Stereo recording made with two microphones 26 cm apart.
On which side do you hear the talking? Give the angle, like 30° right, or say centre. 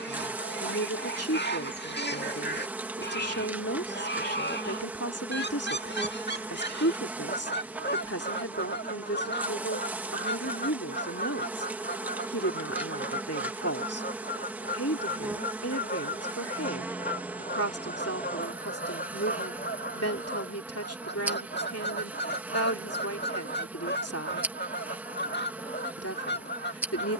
70° left.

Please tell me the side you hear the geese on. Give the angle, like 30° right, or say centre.
40° left.